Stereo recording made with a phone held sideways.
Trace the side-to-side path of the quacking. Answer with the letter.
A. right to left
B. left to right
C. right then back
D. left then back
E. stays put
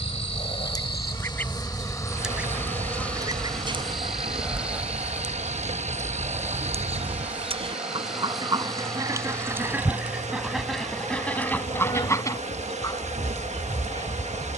C.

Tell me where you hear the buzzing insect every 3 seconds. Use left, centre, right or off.
left, centre, centre, left, left.